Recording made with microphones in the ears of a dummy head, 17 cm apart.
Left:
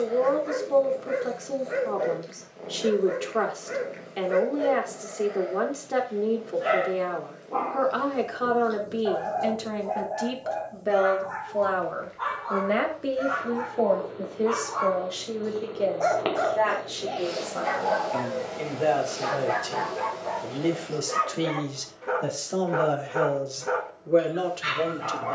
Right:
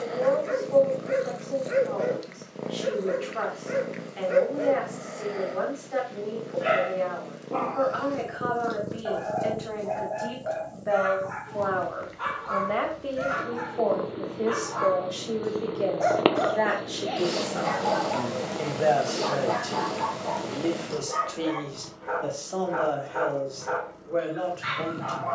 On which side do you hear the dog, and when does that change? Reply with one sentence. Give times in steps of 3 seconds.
You can hear the dog on the right from 0 s, in the centre from 15 s and on the left from 18 s.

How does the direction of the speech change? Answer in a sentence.
You can hear the speech go right and come back.